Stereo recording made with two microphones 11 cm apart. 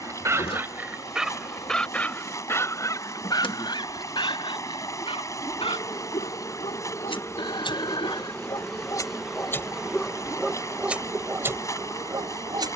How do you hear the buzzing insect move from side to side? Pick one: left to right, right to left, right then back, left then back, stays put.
left to right.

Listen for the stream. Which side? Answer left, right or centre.
left.